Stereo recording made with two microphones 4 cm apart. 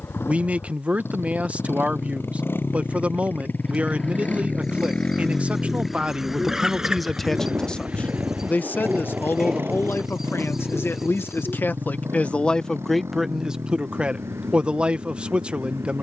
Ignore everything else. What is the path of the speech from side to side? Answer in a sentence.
In this clip you hear the speech move from right to left and back again.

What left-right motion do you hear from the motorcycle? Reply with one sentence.
In this clip you hear the motorcycle travel towards the right.